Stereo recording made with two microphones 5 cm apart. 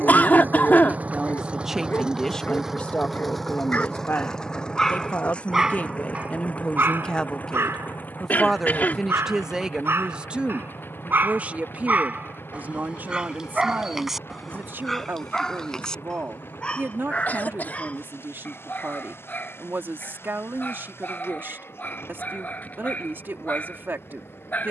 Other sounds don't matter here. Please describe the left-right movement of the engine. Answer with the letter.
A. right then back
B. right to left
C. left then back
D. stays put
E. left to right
B.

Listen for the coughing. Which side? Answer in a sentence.
You can hear the coughing on the left.